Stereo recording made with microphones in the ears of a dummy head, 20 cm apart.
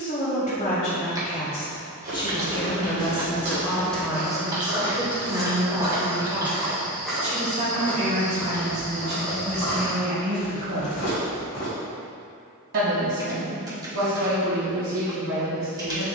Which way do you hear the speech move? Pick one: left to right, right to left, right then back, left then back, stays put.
left to right.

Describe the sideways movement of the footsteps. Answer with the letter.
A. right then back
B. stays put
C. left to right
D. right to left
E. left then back
D.